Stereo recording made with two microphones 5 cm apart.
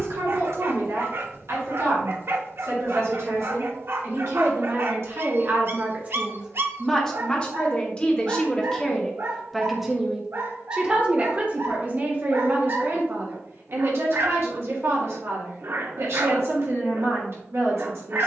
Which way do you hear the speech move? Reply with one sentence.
You can hear the speech move from right to left and back again.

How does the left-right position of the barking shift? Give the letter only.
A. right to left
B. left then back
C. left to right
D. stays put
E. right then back
D.